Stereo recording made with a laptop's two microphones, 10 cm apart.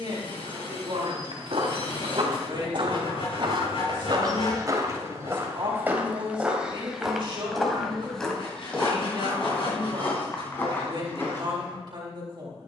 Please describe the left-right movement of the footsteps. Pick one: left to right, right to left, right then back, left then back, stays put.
right to left.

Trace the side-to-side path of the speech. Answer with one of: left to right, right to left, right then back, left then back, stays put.
stays put.